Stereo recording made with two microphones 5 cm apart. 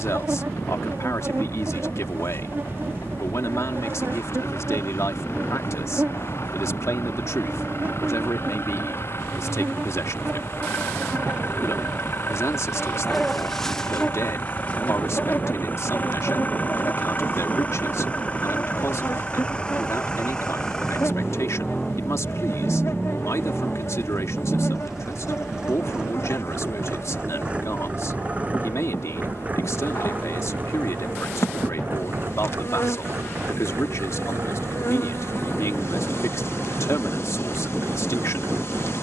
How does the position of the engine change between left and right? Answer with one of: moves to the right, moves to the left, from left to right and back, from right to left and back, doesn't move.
moves to the right.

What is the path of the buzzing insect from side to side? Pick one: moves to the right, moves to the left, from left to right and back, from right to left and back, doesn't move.
moves to the left.